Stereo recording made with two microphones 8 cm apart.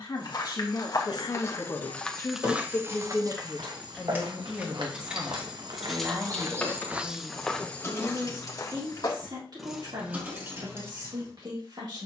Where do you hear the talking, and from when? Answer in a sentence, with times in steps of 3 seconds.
In this clip you hear the talking on the left from 0 s, in the centre from 3 s and on the right from 6 s.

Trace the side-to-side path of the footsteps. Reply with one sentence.
In this clip you hear the footsteps move from left to right and back again.